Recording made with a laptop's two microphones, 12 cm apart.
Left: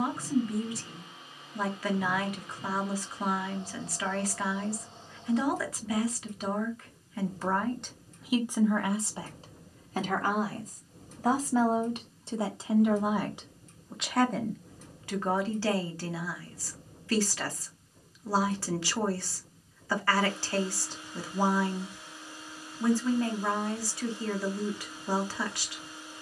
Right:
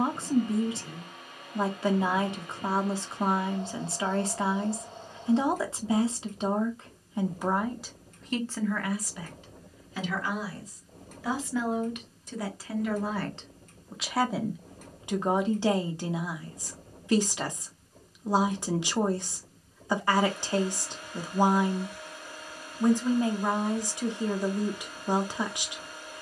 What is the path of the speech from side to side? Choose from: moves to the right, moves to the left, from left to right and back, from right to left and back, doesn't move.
from right to left and back.